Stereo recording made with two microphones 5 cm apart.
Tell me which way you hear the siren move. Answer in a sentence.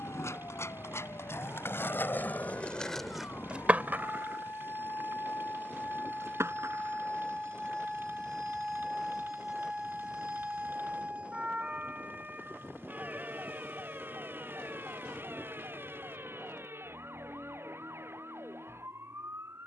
In this clip you hear the siren travel towards the right.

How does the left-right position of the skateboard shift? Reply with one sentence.
In this clip you hear the skateboard move from left to right.